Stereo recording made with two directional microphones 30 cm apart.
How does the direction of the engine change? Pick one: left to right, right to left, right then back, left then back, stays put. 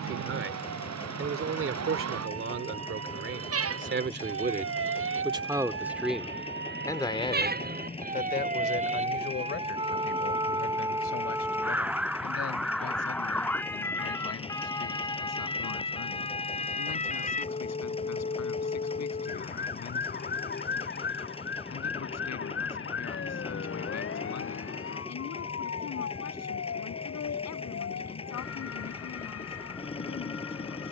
stays put.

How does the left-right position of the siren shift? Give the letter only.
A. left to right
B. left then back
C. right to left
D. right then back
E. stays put
C.